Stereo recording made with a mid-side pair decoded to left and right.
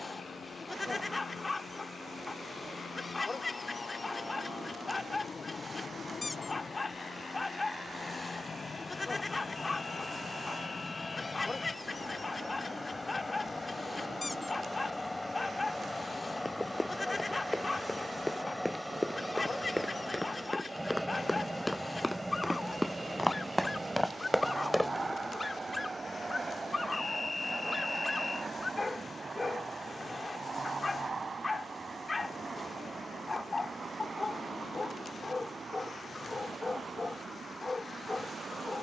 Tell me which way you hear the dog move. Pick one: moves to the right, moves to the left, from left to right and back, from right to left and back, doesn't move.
doesn't move.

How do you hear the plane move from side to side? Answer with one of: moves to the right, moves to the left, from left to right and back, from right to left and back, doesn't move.
moves to the right.